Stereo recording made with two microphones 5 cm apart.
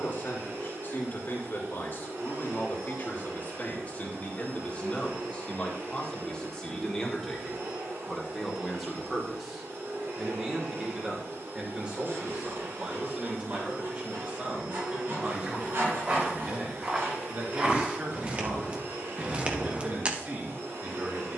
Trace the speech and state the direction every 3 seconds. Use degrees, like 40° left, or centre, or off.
50° left, 30° left, 10° left, 20° right, 30° right, 40° right, 40° right.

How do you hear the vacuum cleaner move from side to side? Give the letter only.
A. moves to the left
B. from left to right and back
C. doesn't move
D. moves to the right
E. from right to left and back
C.